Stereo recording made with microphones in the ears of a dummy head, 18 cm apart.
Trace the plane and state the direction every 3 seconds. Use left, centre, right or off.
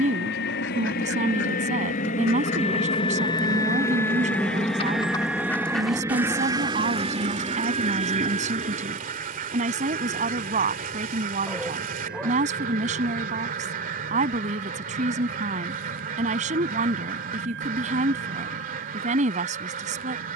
left, centre, right, right, right, right, right.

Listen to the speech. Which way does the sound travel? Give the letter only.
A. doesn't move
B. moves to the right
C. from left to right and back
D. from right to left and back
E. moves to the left
A.